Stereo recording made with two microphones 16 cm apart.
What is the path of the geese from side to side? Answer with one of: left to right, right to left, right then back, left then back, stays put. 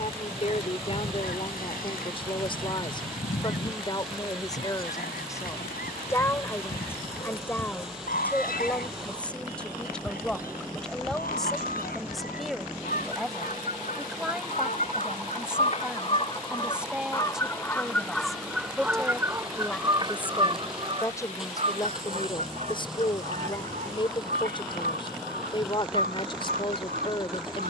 left to right.